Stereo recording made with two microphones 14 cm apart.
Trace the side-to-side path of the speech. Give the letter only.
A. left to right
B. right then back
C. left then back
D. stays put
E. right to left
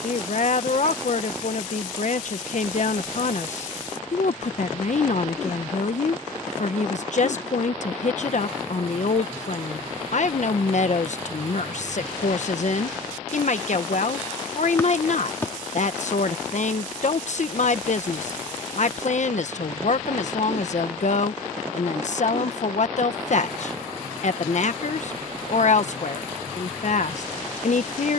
D.